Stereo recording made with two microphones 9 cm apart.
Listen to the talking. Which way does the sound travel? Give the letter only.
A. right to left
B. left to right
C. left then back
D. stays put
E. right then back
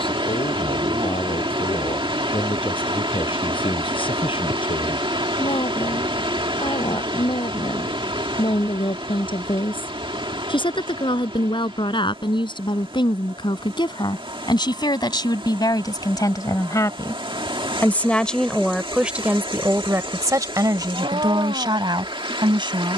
B.